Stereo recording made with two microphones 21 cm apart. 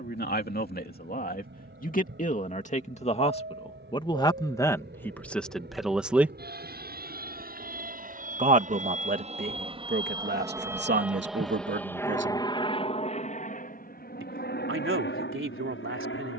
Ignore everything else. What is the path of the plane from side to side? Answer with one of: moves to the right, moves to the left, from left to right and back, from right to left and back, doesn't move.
moves to the left.